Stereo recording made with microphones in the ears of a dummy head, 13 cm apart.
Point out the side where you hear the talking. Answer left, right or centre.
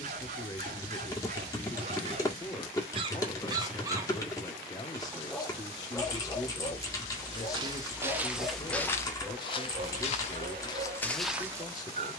left.